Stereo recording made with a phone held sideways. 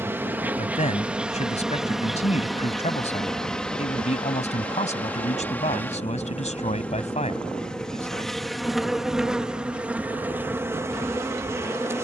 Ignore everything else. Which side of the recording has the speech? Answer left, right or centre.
left.